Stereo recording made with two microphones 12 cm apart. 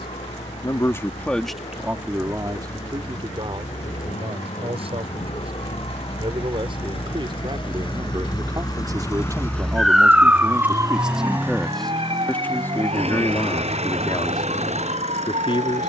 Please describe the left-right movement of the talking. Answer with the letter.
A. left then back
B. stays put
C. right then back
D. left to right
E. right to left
C.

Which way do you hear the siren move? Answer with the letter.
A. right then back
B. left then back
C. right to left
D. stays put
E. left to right
E.